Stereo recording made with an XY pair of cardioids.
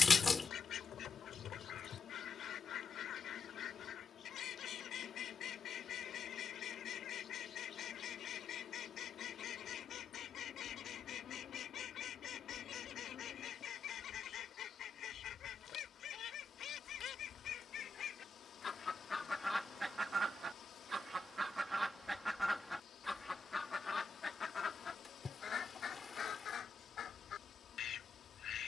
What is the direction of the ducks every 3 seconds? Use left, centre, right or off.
left, left, left, left, left, left, centre, centre, left, left.